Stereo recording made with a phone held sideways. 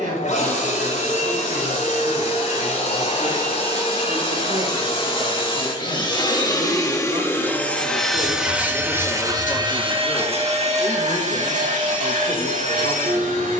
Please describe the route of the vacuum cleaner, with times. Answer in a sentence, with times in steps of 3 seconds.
You can hear the vacuum cleaner on the left from 0 s, in the centre from 6 s and on the right from 9 s.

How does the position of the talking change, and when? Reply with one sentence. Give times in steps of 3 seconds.
In this clip you hear the talking on the right from 0 s and on the left from 9 s.